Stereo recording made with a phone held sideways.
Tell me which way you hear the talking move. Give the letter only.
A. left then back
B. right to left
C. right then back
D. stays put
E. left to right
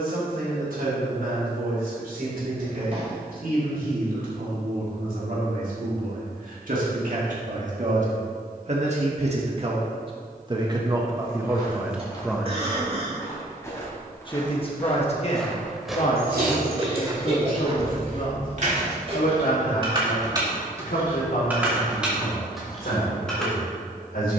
B.